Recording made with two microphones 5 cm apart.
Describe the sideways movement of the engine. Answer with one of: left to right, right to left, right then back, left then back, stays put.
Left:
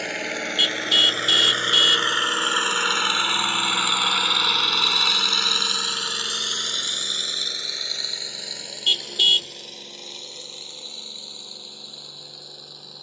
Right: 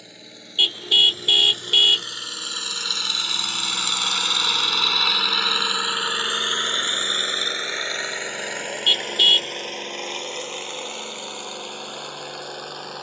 left to right.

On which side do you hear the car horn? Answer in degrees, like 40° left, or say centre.
20° right.